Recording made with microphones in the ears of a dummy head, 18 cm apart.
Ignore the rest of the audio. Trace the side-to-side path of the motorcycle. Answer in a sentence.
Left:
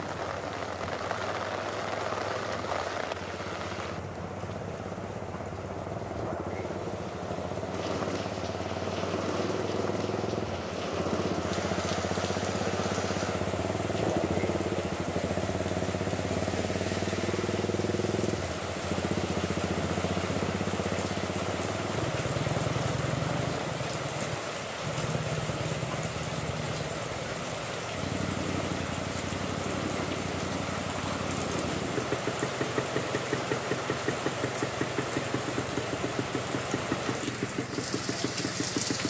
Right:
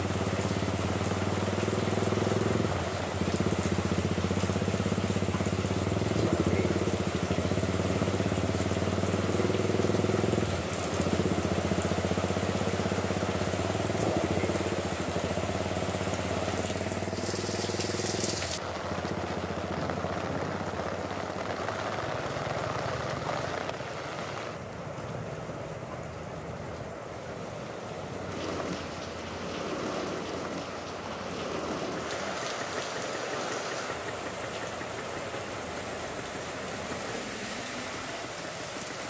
You can hear the motorcycle go from the right side to the left.